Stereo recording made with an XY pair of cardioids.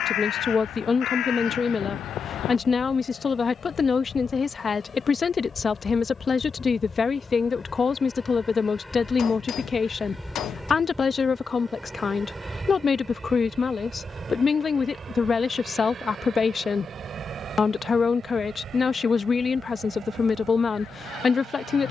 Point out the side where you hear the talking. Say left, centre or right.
left.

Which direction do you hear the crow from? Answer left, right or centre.
left.